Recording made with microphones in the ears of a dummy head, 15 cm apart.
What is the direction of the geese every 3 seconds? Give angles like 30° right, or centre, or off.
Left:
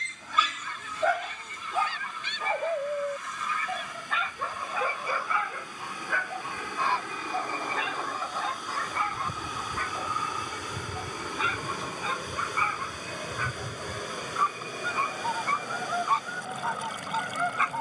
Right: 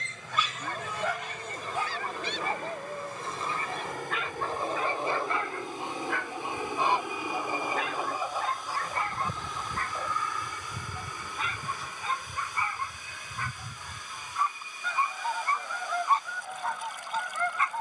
40° right, 30° right, 10° right, 10° right, centre, 10° left.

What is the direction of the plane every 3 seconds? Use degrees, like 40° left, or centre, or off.
50° right, 30° right, 10° right, 10° left, 30° left, 40° left.